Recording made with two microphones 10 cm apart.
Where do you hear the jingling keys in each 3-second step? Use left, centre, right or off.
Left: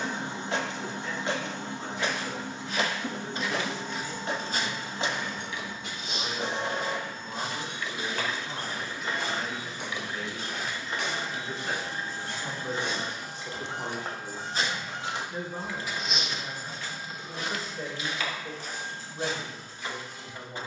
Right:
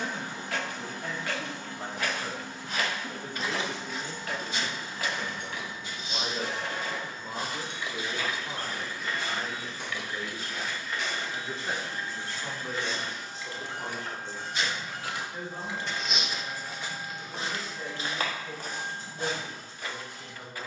off, right, right, left, left, right, right.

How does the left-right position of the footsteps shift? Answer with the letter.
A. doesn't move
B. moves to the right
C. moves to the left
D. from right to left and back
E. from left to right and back
D.